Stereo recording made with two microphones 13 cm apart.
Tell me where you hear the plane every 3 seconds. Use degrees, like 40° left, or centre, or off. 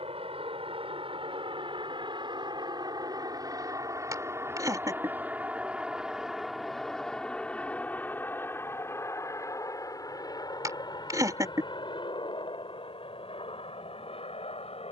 40° right, 20° right, 10° left, 30° left, 40° left.